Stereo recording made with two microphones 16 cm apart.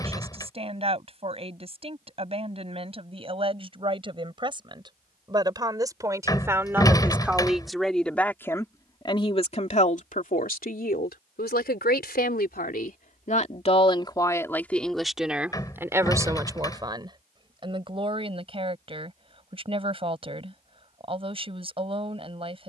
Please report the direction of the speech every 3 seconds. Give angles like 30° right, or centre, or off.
40° right, 30° right, centre, 60° left, 40° left, 20° right, 30° right, 30° right.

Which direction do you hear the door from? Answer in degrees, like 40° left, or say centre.
20° left.